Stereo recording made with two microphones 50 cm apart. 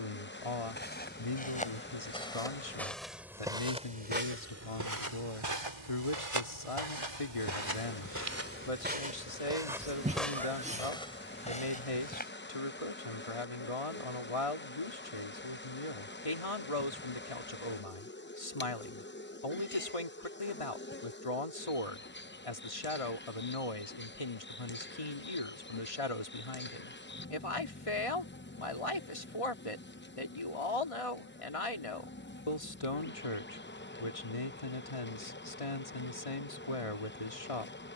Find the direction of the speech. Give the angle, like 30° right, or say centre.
90° left.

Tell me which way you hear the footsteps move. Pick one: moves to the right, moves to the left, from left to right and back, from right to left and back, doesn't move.
from left to right and back.